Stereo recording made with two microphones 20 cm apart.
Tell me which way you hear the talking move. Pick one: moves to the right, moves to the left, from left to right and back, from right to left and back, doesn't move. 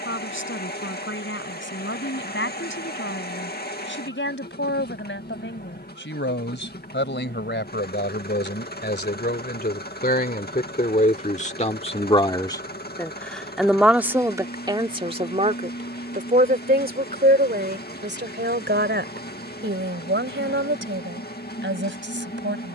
moves to the right.